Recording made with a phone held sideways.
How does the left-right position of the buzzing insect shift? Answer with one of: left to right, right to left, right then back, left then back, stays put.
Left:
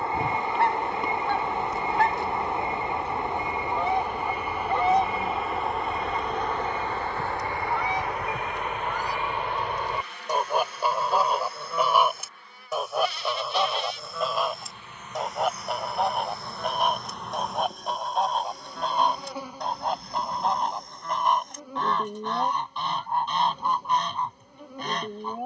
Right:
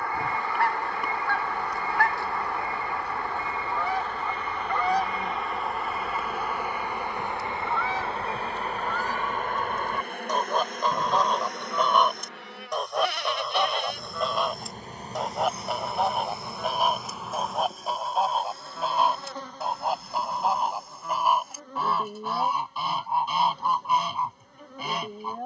right then back.